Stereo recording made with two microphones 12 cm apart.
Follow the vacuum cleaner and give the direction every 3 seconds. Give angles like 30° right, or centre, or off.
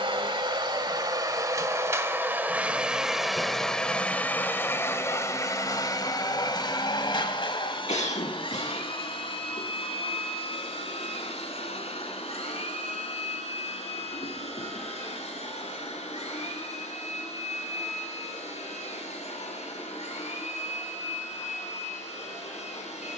30° right, 20° left, 40° left, 60° left, 60° left, 70° left, 70° left, 70° left.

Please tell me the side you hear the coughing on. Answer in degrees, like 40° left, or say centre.
70° left.